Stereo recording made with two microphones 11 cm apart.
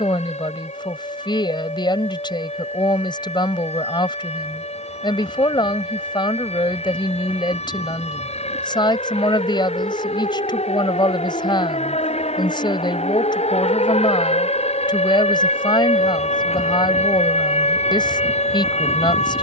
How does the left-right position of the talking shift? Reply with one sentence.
You can hear the talking stay put.